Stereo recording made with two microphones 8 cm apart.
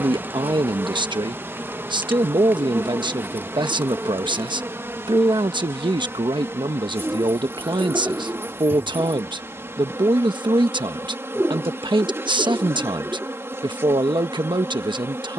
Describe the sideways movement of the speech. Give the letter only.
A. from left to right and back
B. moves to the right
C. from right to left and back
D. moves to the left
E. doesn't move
E.